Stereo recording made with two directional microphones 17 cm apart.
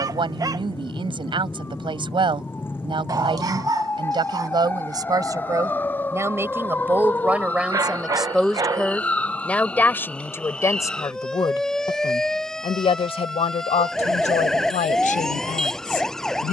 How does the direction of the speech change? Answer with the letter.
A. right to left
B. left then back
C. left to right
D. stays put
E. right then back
A.